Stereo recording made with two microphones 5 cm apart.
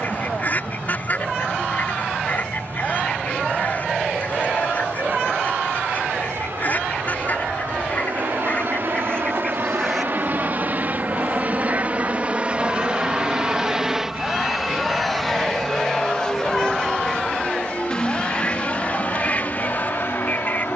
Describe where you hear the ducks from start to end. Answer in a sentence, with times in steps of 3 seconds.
In this clip you hear the ducks on the left from 0 s, in the centre from 9 s, on the right from 12 s, in the centre from 15 s and on the left from 18 s.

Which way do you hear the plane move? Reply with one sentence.
In this clip you hear the plane travel towards the left.